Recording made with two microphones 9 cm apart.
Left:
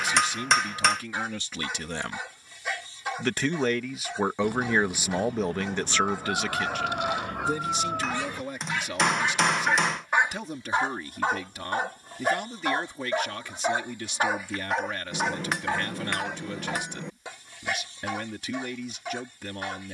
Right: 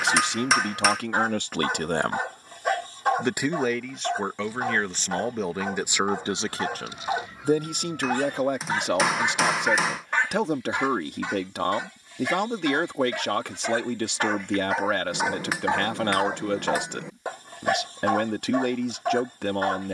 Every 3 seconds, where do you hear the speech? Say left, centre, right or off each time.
right, centre, right, right, right, right, right.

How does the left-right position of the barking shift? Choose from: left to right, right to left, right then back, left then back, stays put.
left then back.